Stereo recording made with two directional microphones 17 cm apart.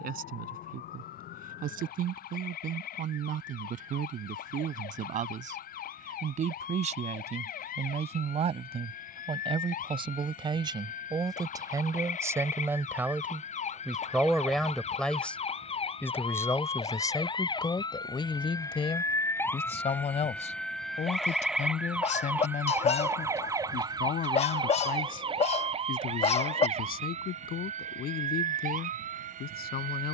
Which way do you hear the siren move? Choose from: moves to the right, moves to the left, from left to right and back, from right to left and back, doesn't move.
moves to the right.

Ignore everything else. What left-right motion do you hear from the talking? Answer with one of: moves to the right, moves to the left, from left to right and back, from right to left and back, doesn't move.
moves to the left.